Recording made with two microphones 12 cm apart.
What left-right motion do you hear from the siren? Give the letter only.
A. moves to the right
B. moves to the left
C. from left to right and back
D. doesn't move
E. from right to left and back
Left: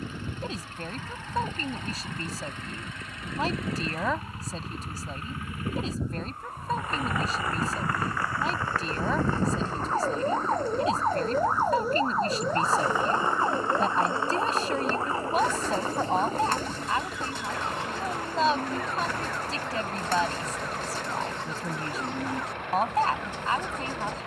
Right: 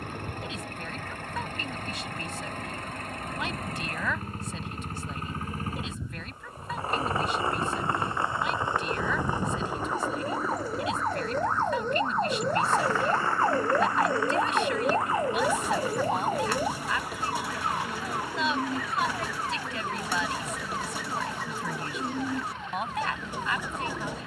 A.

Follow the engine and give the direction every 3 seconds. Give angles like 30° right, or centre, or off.
50° right, 40° right, 30° right, 10° right, 20° left, 40° left, 50° left, 60° left.